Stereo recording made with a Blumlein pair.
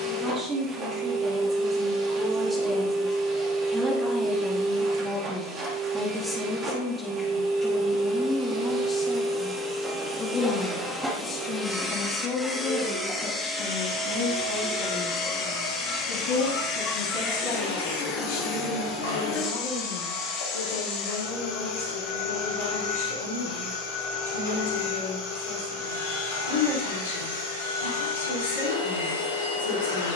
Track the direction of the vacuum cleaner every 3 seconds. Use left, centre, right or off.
right, right, right, centre, centre, left, left, left, left, left.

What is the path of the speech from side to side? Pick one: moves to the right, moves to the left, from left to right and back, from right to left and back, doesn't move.
moves to the left.